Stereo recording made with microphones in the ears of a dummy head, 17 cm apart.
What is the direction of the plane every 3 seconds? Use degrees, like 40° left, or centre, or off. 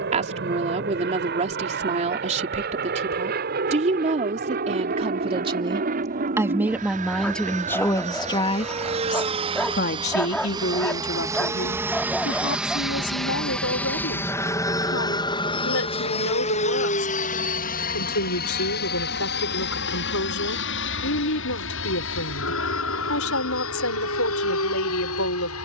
50° right, 50° right, 40° right, 20° right, centre, 30° left, 50° left, 60° left, 70° left.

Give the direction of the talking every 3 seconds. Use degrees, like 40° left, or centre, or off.
30° right, 30° right, 10° left, 60° left, 80° left, 80° left, 80° left, 80° left, 80° left.